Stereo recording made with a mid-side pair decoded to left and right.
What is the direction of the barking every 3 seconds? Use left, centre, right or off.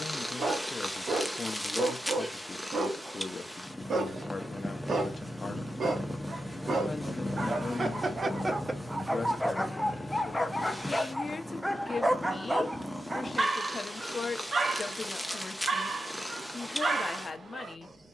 right, right, right, centre, right, right.